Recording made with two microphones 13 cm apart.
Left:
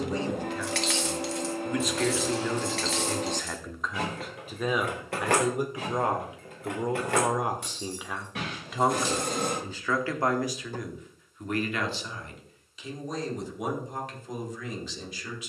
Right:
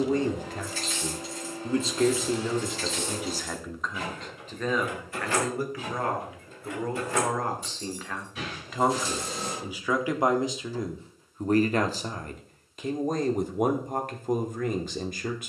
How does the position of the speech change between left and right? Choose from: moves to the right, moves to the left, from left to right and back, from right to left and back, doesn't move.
from right to left and back.